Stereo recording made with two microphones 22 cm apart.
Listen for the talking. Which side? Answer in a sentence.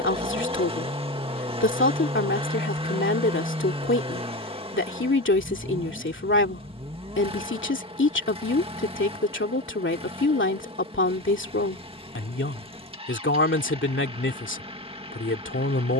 You can hear the talking on the left.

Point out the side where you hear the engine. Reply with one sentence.
In this clip you hear the engine on the right.